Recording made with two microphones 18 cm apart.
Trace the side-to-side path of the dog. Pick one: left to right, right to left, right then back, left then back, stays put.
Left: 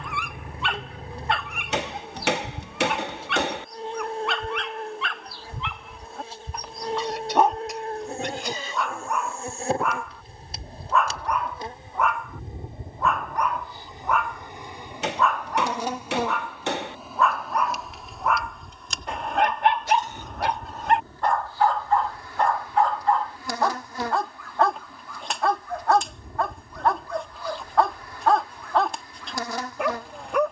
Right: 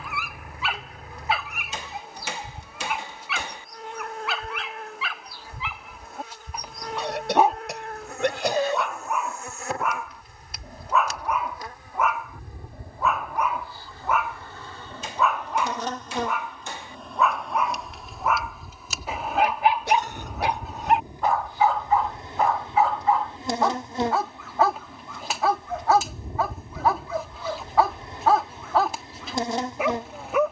stays put.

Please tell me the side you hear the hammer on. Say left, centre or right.
left.